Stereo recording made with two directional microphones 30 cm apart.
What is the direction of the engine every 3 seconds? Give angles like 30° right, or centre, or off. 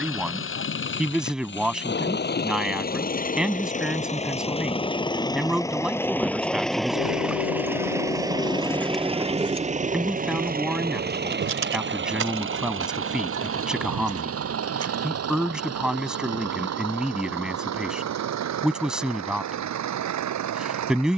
40° left, 20° left, centre, 30° right, 50° right, 60° right, 60° right.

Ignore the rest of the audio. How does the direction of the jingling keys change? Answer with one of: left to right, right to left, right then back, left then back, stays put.
left to right.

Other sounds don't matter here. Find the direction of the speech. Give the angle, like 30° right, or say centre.
centre.